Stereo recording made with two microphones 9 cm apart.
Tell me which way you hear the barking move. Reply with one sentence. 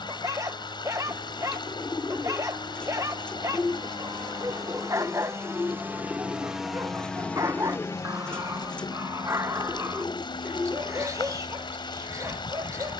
You can hear the barking stay in one place.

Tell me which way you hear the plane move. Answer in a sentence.
You can hear the plane move from right to left.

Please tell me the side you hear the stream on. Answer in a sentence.
In this clip you hear the stream on the left.